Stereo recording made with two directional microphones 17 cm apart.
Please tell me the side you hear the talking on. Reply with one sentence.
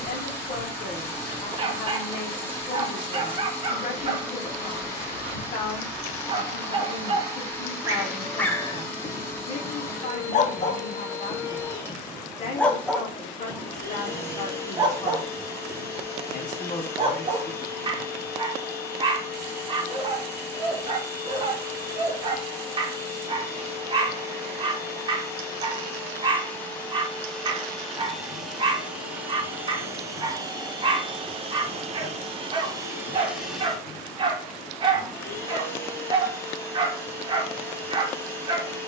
In this clip you hear the talking on the left.